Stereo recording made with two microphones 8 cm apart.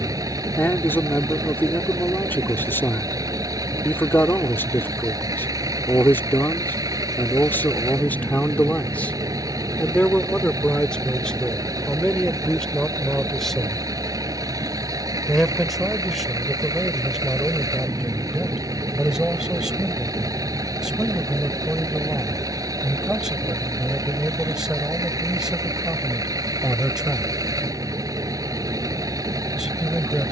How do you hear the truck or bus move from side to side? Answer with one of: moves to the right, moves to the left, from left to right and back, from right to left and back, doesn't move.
doesn't move.